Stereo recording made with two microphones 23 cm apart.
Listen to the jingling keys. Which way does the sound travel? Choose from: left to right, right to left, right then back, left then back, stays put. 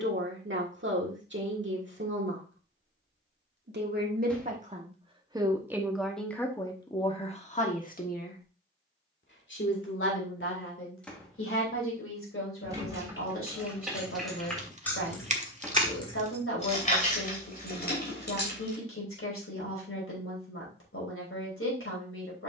right to left.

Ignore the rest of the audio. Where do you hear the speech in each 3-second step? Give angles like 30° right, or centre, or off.
50° right, 30° right, 20° left, 60° left, 70° left, 70° left, 70° left, 70° left.